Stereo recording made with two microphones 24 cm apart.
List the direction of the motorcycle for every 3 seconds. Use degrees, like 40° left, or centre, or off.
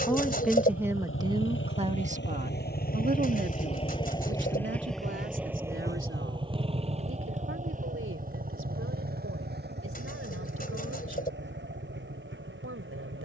60° left, 10° left, 30° right, 50° right, 50° right.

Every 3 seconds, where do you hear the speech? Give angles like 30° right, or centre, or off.
20° right, 50° right, 60° right, 70° right, 70° right.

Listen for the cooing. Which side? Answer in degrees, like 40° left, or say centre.
40° left.